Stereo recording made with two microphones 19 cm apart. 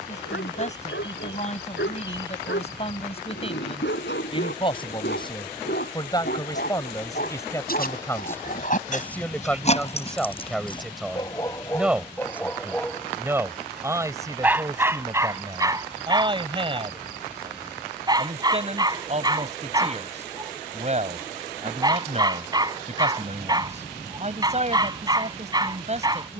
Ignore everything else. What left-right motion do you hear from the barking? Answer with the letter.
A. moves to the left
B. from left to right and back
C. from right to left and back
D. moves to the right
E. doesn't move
D.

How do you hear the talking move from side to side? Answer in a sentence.
You can hear the talking travel towards the right.